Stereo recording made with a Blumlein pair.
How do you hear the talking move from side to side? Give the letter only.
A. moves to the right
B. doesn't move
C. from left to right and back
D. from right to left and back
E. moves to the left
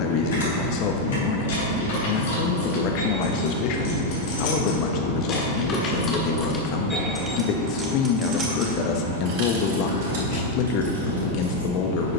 B.